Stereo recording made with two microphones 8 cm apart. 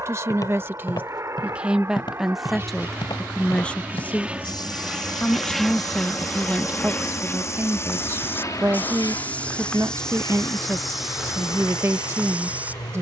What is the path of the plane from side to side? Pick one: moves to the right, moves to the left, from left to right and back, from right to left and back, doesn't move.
moves to the left.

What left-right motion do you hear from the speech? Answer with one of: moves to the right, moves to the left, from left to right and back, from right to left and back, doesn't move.
from right to left and back.